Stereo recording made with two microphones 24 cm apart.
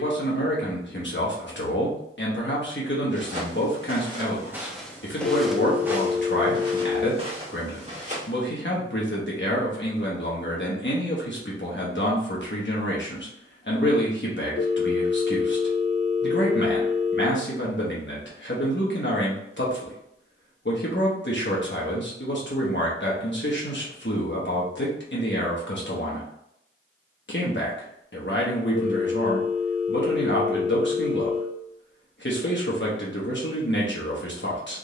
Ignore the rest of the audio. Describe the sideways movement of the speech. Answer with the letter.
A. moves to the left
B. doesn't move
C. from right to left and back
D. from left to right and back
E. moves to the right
B.